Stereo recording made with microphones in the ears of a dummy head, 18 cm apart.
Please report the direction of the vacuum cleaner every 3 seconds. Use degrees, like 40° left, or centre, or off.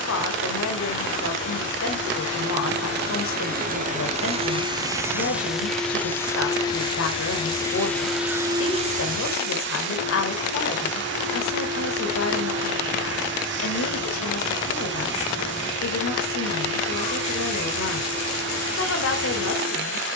70° right, 30° right, 10° left, 60° right, 70° right, 70° right, 70° right.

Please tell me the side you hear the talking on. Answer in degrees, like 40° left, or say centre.
80° left.